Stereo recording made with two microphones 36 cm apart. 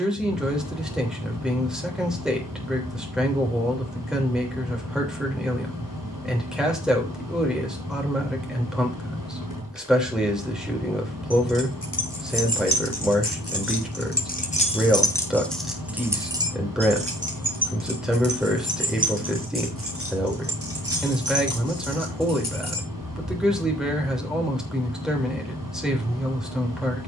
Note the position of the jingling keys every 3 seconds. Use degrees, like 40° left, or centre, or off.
off, off, off, 70° left, 40° left, 10° right, 40° right, 50° right, off.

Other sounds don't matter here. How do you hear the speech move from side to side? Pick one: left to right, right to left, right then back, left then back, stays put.
stays put.